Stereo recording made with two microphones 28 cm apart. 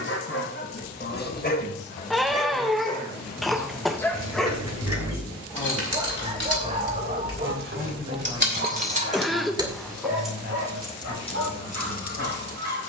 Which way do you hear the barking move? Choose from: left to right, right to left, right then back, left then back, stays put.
left to right.